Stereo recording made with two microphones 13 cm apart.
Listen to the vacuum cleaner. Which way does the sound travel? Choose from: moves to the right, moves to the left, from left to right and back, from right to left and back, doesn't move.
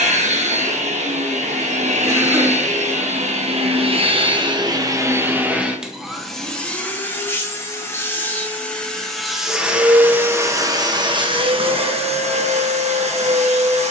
from right to left and back.